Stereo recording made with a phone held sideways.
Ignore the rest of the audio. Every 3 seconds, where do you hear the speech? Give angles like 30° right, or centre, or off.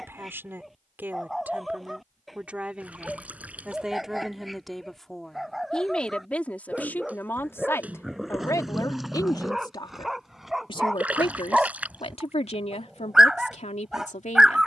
10° right, centre, 20° left, 40° left, 60° left.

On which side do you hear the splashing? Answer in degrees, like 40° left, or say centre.
10° right.